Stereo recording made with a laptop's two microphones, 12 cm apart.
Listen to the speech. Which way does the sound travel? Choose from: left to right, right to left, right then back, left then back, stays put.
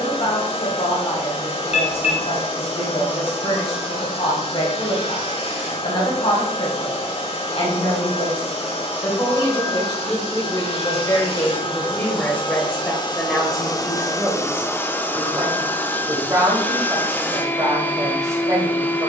left to right.